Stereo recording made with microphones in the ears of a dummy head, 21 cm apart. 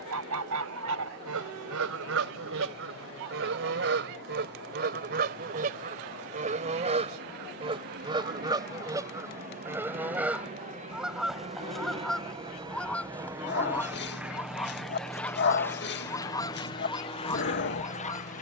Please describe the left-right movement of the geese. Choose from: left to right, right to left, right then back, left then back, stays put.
right to left.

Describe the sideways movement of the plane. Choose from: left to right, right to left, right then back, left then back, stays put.
right to left.